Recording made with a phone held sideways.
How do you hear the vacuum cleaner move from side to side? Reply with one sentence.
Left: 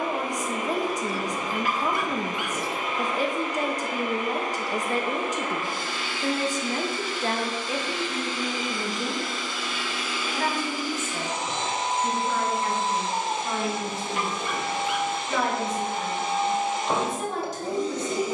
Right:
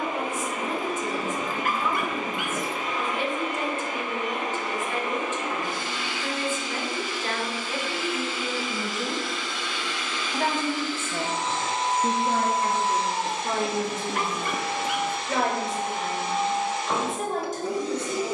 You can hear the vacuum cleaner travel towards the left.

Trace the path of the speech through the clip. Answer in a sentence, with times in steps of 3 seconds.
In this clip you hear the speech on the left from 0 s and on the right from 9 s.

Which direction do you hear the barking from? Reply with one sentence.
In this clip you hear the barking on the right.